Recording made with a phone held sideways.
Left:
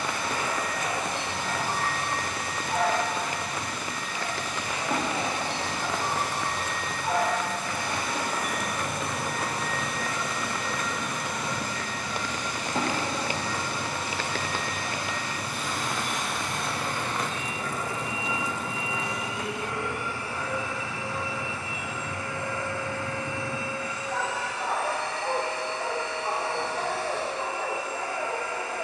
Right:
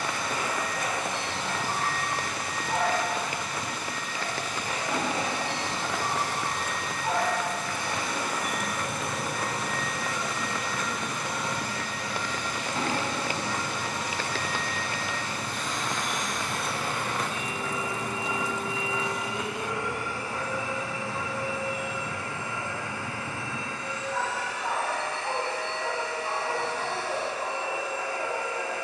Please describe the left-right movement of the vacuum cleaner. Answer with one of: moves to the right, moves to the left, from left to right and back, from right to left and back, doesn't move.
from left to right and back.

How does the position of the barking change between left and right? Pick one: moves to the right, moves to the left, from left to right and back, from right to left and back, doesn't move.
moves to the left.